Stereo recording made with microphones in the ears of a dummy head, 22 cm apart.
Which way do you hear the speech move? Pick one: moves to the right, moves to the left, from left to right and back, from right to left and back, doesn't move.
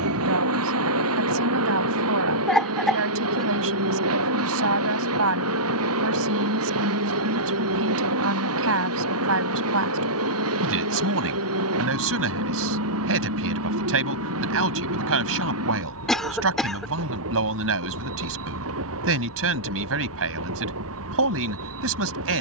doesn't move.